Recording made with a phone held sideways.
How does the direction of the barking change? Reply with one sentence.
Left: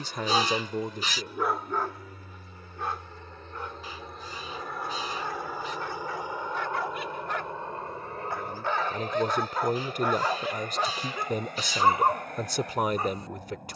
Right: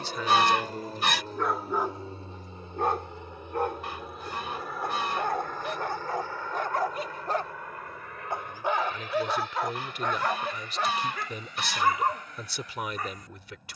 In this clip you hear the barking go right and come back.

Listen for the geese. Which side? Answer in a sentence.
In this clip you hear the geese on the right.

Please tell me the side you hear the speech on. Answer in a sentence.
In this clip you hear the speech on the left.